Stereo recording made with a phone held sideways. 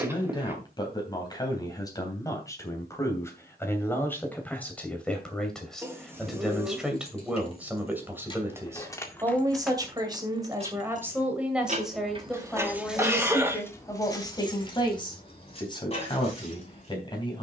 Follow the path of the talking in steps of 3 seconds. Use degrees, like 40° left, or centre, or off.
20° left, 10° left, 10° right, 20° right, 20° left, 30° left.